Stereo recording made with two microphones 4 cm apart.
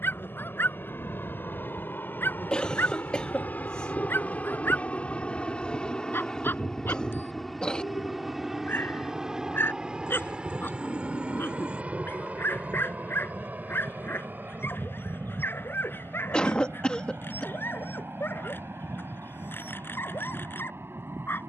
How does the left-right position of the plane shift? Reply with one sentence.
You can hear the plane go from the left side to the right.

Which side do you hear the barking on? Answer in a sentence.
In this clip you hear the barking on the left.